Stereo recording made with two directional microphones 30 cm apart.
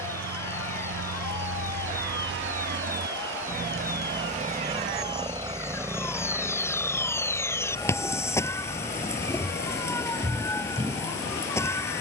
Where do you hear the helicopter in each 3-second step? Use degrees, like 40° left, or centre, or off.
50° right, 20° right, 10° left, 40° left.